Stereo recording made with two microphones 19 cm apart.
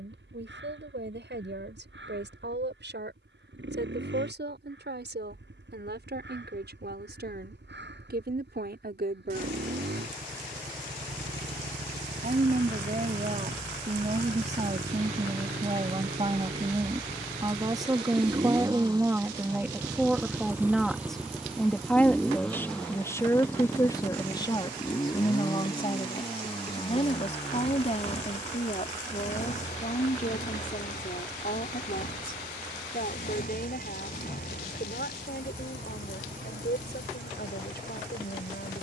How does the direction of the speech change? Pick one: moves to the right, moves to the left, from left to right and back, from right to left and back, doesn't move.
moves to the left.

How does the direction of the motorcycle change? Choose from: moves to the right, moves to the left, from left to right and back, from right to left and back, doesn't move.
moves to the left.